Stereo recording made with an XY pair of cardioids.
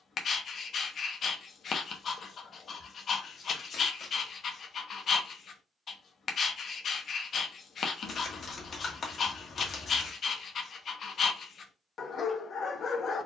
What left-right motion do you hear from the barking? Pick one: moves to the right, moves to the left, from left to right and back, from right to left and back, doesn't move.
doesn't move.